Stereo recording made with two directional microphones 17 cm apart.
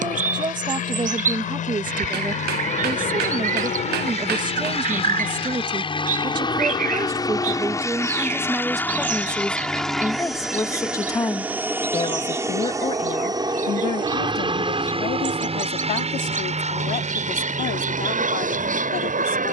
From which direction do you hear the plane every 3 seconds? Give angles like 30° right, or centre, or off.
50° left, 40° left, 20° left, centre, 20° right, 40° right, 50° right.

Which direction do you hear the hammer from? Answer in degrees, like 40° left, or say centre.
70° right.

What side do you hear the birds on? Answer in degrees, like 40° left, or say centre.
50° right.